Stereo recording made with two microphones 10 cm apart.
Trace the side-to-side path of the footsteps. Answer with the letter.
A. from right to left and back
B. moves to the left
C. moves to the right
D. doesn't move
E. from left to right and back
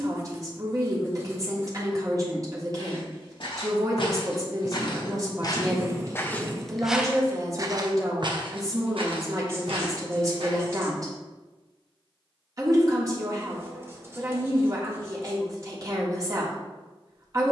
C.